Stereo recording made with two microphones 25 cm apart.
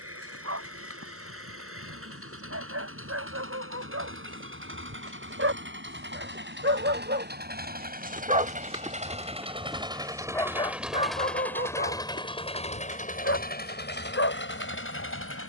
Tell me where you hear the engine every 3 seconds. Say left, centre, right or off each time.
right, right, right, centre, left.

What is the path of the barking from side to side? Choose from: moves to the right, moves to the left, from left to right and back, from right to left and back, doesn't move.
moves to the left.